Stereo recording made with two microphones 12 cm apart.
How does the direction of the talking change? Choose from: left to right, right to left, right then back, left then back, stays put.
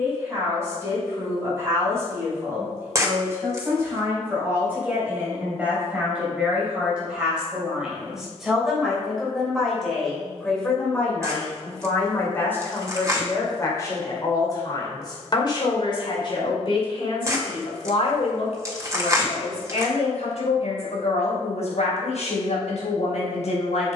right to left.